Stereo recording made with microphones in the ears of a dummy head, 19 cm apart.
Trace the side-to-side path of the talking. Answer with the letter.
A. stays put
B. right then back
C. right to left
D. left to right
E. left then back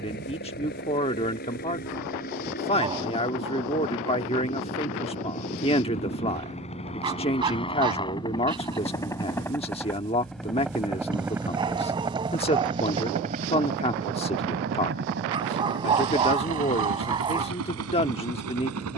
A.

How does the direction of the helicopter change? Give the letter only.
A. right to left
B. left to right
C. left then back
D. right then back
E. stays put
B.